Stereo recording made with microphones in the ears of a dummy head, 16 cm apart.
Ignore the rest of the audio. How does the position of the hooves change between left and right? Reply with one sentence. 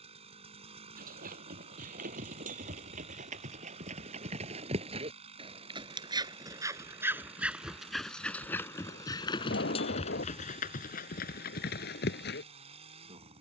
In this clip you hear the hooves travel towards the left.